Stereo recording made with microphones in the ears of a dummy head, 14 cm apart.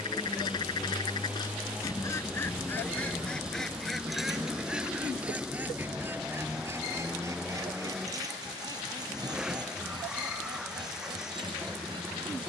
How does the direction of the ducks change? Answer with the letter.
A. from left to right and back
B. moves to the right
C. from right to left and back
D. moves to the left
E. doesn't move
B.